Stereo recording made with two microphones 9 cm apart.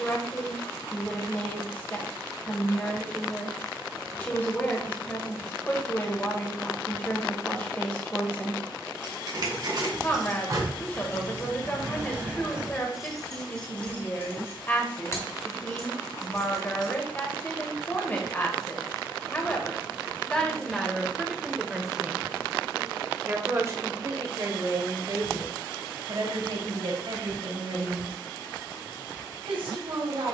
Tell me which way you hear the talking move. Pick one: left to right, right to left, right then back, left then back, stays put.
left to right.